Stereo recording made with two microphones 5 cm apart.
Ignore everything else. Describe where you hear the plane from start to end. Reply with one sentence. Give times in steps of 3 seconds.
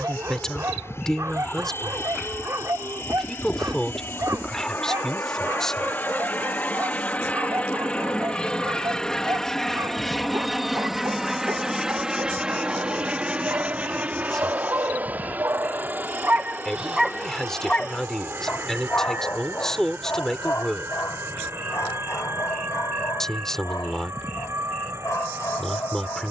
In this clip you hear the plane on the left from 0 s, in the centre from 9 s and on the right from 12 s.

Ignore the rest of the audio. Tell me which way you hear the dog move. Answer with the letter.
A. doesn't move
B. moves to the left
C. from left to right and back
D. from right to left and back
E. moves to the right
B.